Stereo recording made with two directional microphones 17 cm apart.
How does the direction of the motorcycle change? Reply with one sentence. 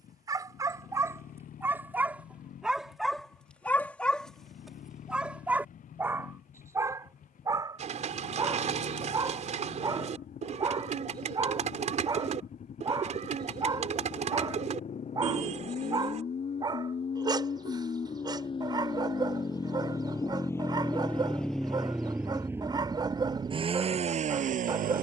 You can hear the motorcycle go from the left side to the right.